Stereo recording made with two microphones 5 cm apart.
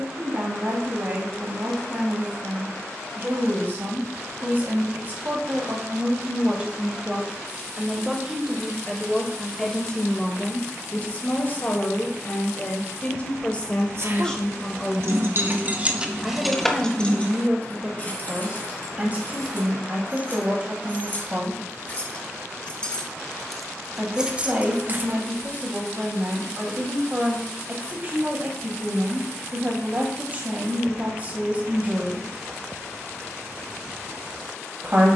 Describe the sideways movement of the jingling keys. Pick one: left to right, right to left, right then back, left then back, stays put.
left then back.